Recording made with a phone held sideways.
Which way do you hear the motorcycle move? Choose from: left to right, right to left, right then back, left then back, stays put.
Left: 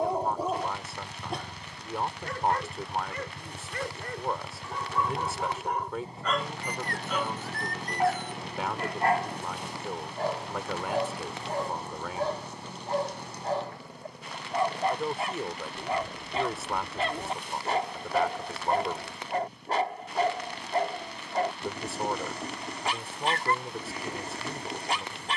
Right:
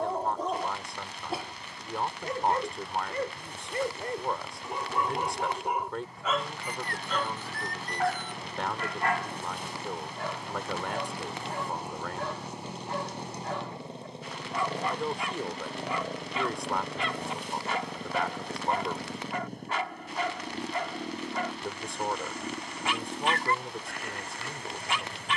left to right.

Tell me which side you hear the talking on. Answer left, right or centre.
centre.